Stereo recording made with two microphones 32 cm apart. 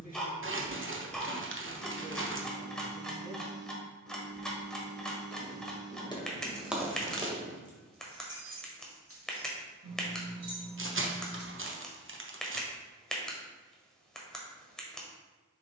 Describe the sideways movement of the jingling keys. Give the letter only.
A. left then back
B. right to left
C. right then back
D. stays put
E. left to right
E.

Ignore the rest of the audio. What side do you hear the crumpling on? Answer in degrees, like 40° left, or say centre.
40° right.